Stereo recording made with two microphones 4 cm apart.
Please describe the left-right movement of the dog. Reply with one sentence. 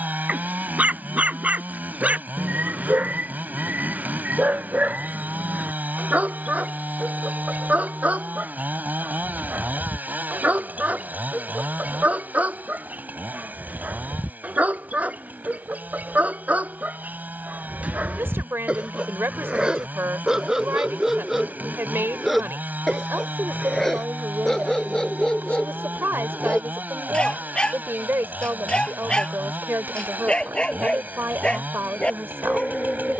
In this clip you hear the dog go from the right side to the left.